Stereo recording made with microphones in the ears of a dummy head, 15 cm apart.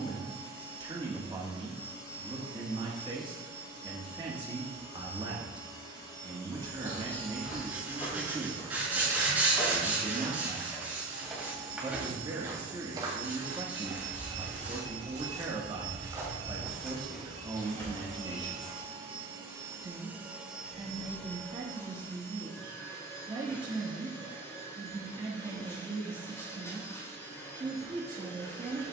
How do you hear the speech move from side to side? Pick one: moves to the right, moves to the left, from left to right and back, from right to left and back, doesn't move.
doesn't move.